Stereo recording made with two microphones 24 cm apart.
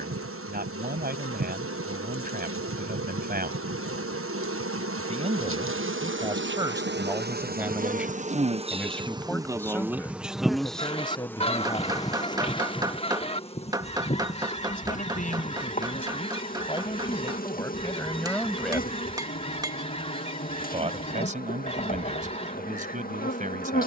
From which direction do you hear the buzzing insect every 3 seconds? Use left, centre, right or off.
right, right, right, centre, left, left, left, left.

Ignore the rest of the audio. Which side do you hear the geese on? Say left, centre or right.
left.